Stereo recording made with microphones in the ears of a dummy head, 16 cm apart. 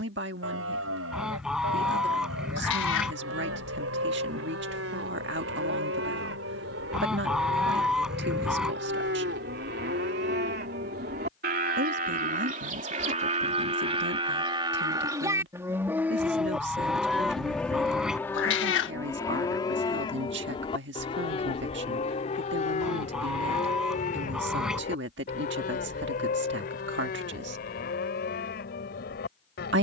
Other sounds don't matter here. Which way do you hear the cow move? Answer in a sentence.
You can hear the cow travel towards the left.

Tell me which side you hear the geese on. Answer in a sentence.
You can hear the geese in the centre.